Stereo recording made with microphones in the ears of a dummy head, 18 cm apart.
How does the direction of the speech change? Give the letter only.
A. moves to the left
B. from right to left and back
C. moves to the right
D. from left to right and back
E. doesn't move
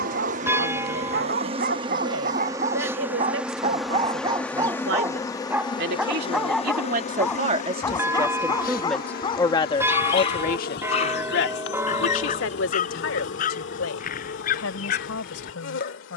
A.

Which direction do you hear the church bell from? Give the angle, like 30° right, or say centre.
10° right.